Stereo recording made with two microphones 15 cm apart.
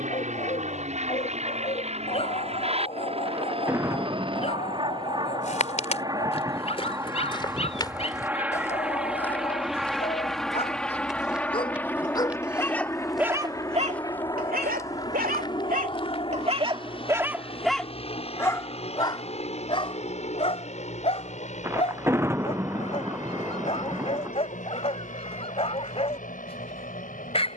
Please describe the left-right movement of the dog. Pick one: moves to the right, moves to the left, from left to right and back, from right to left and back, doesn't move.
from left to right and back.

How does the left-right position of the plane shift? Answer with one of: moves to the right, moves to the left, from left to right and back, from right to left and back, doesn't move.
moves to the left.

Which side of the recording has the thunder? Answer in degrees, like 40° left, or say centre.
20° right.